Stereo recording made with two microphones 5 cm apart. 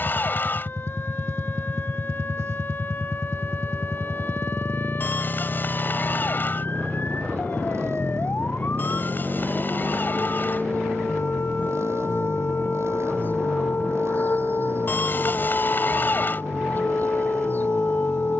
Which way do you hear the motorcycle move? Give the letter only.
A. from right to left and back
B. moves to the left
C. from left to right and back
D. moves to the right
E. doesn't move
E.